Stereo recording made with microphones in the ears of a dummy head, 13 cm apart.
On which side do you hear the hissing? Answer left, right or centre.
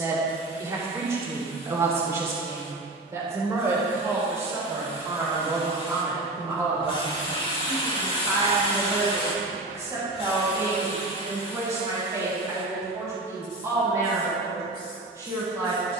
left.